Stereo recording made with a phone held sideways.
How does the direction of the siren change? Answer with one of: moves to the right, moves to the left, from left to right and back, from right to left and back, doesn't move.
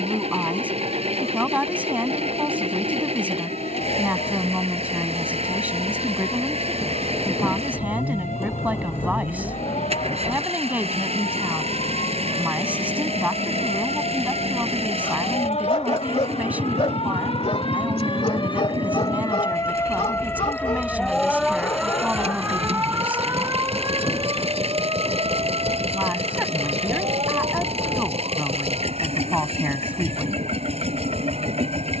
moves to the right.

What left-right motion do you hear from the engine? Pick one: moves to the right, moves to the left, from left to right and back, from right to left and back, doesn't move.
doesn't move.